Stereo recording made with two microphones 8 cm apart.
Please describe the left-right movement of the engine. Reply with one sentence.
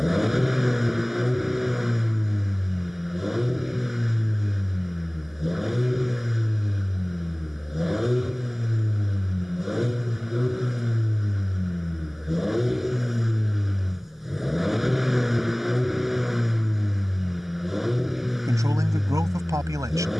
In this clip you hear the engine stay in one place.